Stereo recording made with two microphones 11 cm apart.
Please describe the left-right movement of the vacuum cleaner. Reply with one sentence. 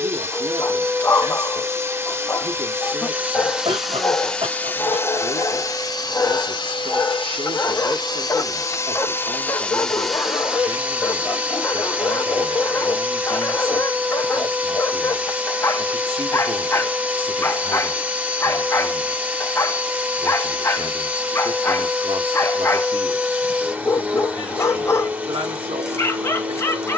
In this clip you hear the vacuum cleaner move from right to left and back again.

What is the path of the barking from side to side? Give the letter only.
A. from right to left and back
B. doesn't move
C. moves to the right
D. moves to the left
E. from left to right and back
B.